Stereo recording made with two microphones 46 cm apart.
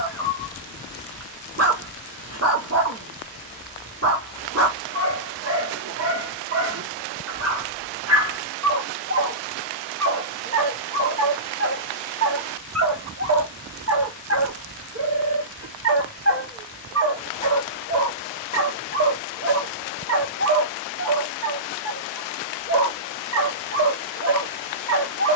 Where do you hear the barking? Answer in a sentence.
You can hear the barking on the right.